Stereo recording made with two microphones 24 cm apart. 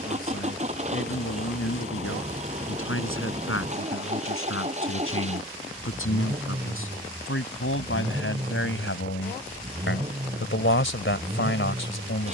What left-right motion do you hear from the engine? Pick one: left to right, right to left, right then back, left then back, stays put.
stays put.